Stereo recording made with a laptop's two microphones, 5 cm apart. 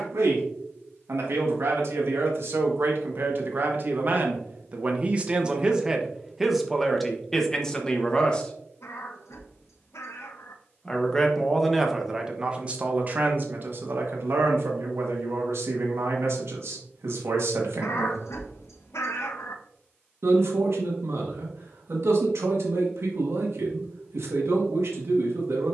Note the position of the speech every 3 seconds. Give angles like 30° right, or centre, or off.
70° right, 40° right, 10° left, centre, 50° right, 70° right, 70° right, 70° right, 70° right.